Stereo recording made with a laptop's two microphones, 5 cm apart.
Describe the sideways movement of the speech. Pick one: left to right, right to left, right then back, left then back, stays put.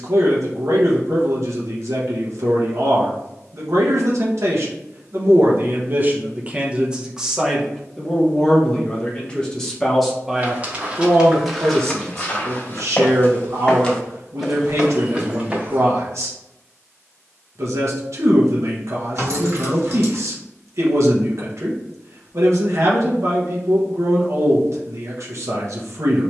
left then back.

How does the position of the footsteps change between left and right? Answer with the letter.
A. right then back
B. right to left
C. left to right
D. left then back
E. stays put
D.